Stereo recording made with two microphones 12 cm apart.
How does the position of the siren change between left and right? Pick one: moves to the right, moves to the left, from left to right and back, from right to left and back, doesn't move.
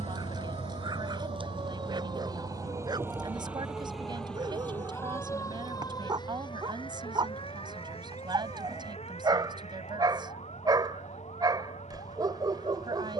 moves to the left.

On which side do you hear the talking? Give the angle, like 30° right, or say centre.
40° right.